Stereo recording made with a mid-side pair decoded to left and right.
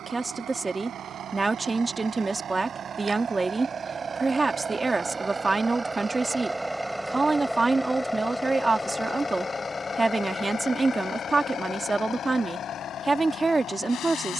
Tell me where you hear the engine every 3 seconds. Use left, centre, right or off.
right, right, centre, left, left.